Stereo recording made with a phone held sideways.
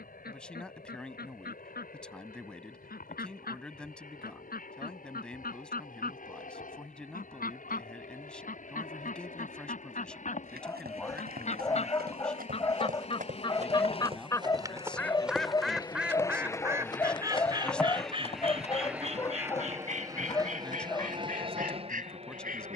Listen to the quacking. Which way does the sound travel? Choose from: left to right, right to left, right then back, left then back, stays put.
left to right.